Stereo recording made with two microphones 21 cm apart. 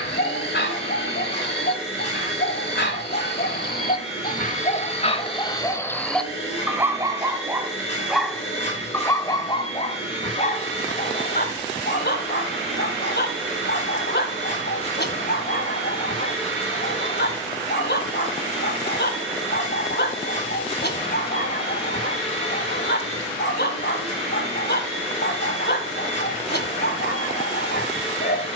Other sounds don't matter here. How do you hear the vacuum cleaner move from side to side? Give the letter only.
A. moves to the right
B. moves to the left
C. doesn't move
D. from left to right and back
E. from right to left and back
C.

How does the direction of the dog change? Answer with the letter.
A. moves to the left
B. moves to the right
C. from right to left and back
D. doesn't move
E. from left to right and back
E.